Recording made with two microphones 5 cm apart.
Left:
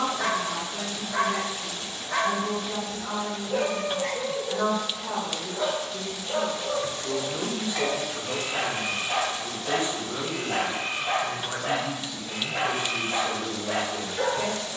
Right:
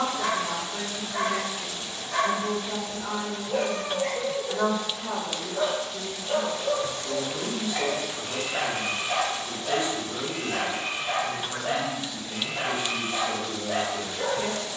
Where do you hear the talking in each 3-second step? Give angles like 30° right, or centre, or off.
30° right, 20° right, 30° left, 50° left, 60° left.